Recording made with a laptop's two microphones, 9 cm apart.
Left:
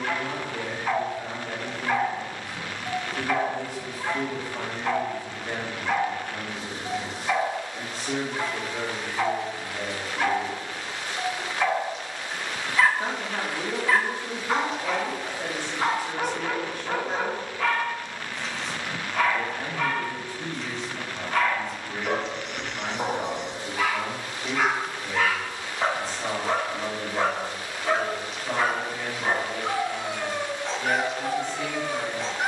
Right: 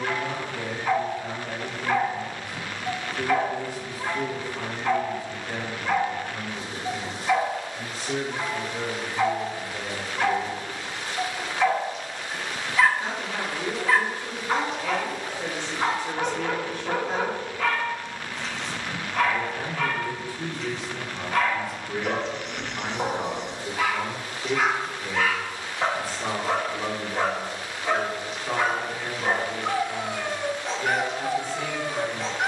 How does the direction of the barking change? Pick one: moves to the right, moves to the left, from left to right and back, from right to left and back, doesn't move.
doesn't move.